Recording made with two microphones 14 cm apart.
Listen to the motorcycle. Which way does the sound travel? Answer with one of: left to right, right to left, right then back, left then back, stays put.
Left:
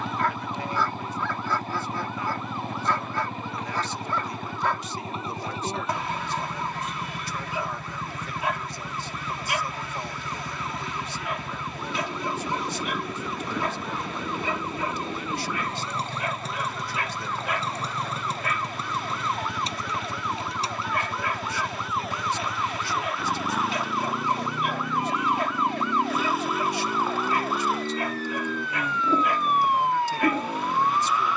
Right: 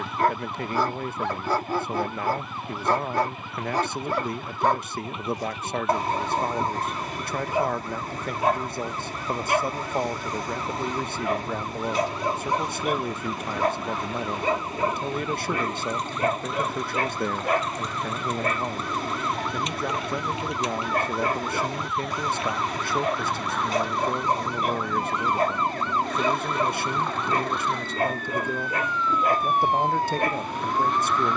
stays put.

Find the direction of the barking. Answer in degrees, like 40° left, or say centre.
40° right.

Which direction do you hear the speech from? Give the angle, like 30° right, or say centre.
50° right.